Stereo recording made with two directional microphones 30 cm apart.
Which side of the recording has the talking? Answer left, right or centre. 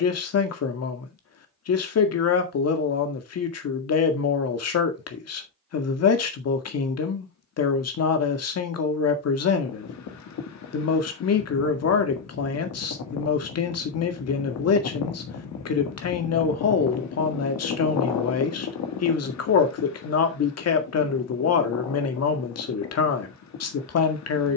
left.